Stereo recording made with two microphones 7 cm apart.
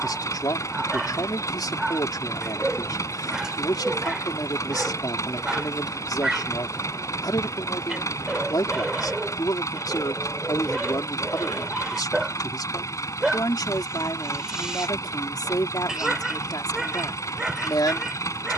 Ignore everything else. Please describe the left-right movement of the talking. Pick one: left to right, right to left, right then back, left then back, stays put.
stays put.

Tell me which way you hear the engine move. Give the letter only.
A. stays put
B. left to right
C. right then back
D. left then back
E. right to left
A.